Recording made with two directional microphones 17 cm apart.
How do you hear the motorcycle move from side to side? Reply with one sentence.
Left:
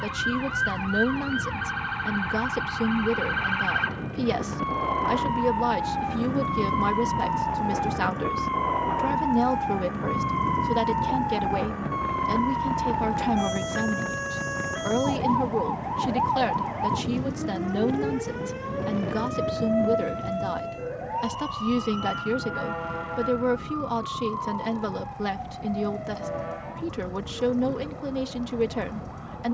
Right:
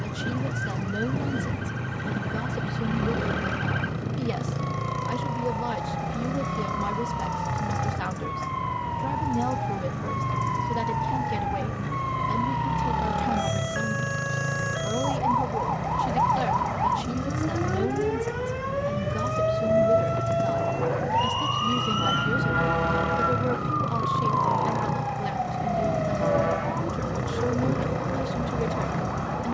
You can hear the motorcycle stay put.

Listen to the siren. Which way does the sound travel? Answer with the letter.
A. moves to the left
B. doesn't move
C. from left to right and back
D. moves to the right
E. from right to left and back
D.